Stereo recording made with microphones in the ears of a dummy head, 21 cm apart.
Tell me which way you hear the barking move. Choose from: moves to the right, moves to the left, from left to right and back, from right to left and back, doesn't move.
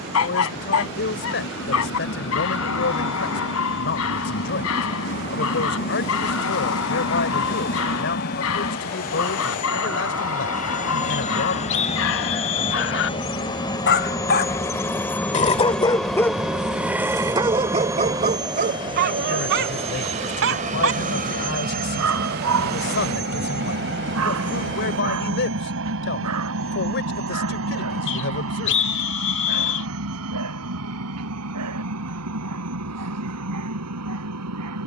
moves to the right.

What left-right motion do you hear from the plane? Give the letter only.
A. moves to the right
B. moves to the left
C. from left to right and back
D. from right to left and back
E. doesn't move
A.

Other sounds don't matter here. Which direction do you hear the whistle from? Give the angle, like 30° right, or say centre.
50° left.